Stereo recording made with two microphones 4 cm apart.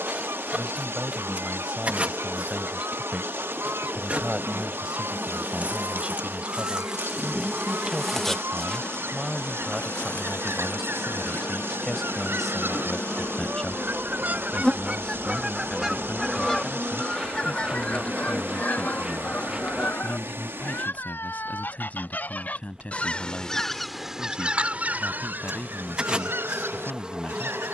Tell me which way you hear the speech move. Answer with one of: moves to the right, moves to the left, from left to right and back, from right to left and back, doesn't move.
moves to the left.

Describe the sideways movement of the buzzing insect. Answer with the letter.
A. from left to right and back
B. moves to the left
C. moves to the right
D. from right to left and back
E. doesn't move
D.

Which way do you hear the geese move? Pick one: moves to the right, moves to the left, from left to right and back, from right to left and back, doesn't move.
from right to left and back.